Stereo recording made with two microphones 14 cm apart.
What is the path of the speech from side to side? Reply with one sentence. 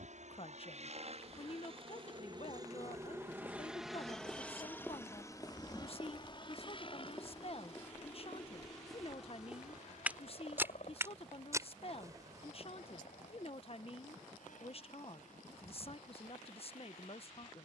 You can hear the speech stay put.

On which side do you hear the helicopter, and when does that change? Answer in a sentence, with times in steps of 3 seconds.
You can hear the helicopter on the right from 0 s, in the centre from 3 s and on the left from 6 s.